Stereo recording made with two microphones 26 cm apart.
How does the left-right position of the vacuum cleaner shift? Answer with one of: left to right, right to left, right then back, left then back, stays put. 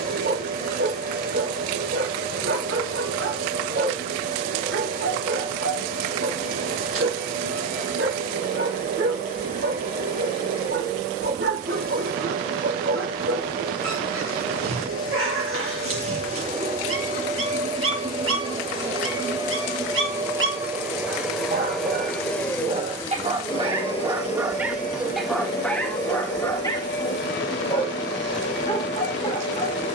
right to left.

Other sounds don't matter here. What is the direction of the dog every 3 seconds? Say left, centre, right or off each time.
right, right, right, right, right, right, right, right, centre, left.